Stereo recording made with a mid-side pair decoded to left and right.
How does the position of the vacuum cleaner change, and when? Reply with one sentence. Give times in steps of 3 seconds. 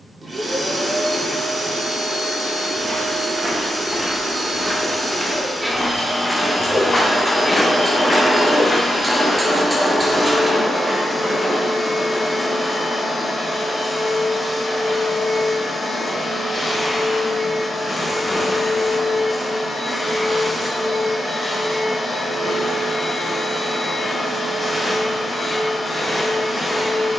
In this clip you hear the vacuum cleaner on the right from 0 s, in the centre from 6 s and on the left from 9 s.